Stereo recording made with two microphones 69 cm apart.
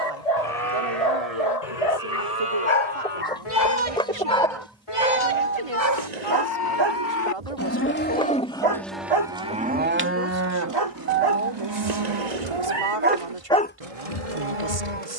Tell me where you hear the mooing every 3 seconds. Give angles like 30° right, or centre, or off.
60° left, 50° left, 20° left, 20° right, 50° right.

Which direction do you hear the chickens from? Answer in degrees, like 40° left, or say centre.
10° left.